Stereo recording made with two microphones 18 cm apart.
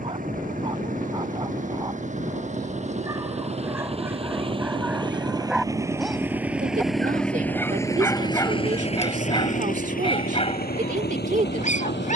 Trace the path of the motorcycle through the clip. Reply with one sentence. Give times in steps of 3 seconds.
You can hear the motorcycle on the right from 0 s, in the centre from 6 s and on the left from 9 s.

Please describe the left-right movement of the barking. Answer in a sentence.
You can hear the barking go from the right side to the left.